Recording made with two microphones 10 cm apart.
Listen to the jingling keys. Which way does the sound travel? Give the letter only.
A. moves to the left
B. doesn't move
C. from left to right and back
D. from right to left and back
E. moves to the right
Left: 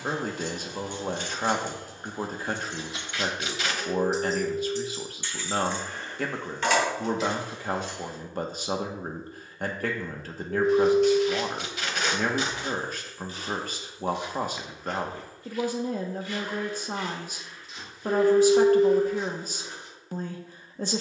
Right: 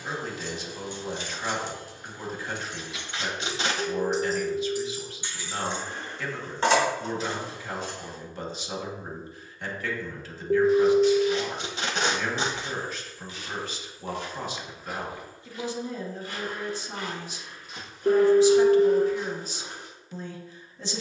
E.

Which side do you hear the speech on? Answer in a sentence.
In this clip you hear the speech on the left.